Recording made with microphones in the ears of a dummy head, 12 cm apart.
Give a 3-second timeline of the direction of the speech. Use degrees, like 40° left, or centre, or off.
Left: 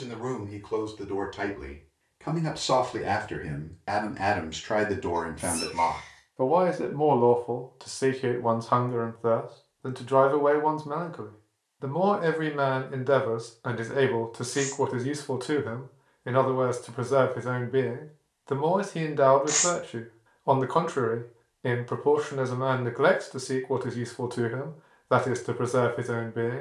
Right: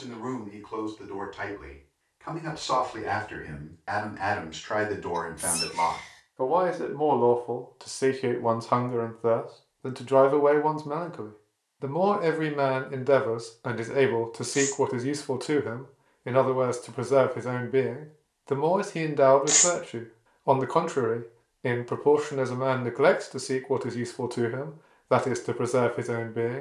40° left, 30° left, centre, 10° right, 10° right, 10° right, 10° right, 10° right, 10° right.